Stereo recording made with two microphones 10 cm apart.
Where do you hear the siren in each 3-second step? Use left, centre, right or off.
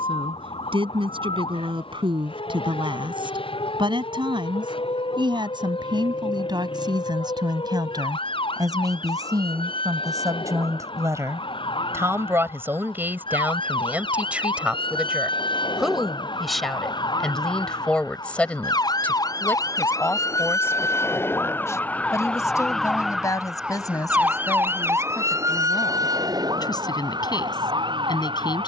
left, left, left, left, left, left, left, centre, right, right.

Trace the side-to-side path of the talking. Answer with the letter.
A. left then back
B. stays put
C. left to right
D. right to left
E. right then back
D.